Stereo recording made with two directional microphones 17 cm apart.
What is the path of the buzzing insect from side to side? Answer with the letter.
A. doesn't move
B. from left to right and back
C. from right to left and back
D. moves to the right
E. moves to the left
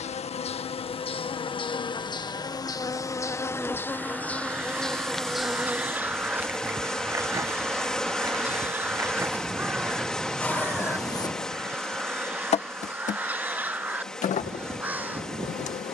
B.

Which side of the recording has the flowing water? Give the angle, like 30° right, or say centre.
centre.